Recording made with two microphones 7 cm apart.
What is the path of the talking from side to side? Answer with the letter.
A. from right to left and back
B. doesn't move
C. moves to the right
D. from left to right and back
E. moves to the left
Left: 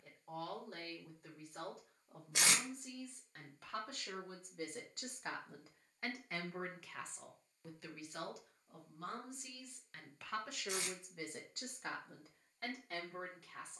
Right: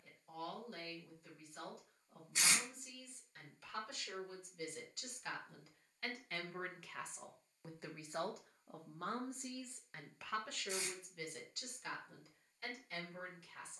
D.